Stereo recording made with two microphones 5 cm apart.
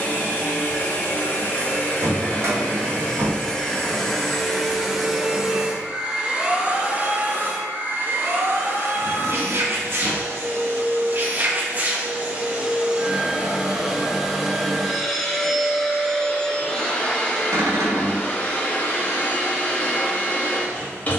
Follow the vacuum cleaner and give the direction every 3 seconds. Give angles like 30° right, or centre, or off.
30° left, centre, 30° right, 40° right, 10° right, 20° left, 30° left.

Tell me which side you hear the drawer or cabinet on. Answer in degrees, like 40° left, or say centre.
70° right.